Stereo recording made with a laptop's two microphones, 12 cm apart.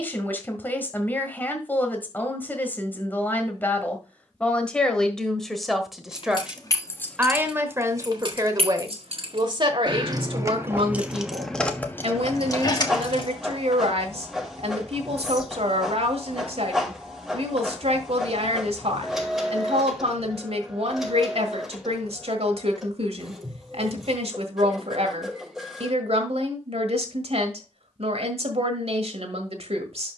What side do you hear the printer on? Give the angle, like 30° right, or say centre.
centre.